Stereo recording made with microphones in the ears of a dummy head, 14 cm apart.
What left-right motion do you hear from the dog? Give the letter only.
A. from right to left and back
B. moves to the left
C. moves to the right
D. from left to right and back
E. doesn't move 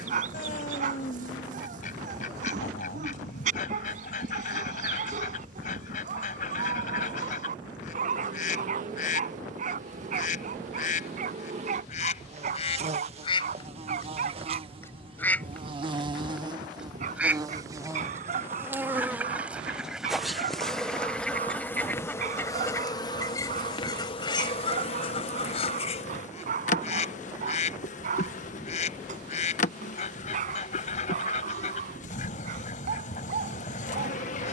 E.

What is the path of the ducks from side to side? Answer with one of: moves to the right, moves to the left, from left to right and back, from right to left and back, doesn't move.
from left to right and back.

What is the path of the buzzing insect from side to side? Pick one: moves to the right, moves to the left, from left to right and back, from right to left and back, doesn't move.
moves to the left.